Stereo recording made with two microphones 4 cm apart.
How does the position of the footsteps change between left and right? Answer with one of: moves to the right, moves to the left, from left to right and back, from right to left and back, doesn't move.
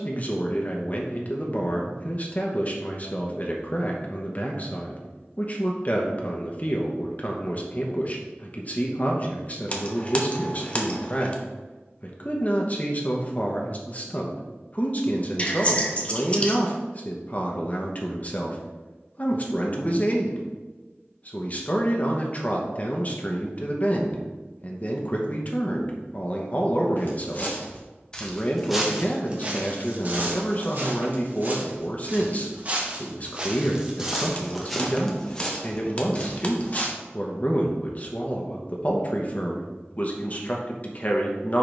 from left to right and back.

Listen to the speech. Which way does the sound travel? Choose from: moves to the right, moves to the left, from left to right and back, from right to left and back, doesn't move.
doesn't move.